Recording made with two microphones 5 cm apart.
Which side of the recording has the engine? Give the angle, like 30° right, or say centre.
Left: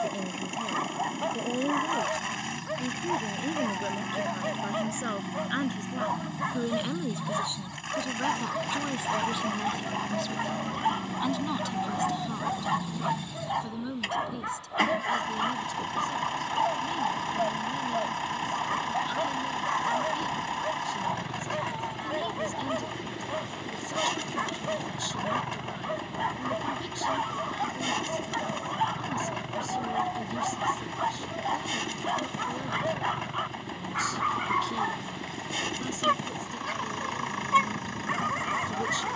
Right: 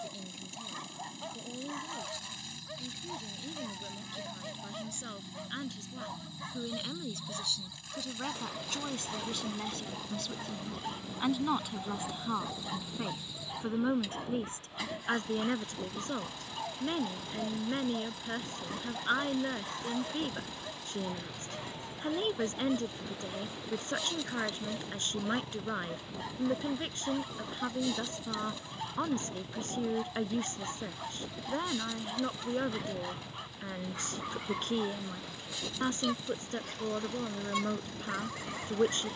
70° left.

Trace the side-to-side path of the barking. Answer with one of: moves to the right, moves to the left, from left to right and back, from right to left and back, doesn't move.
doesn't move.